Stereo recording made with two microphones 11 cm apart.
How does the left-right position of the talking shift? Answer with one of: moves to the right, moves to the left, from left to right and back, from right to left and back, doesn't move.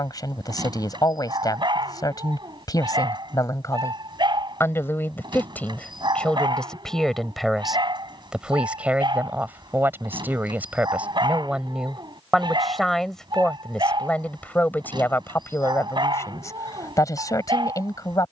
from left to right and back.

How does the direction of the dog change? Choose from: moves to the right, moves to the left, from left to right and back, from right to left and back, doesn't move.
doesn't move.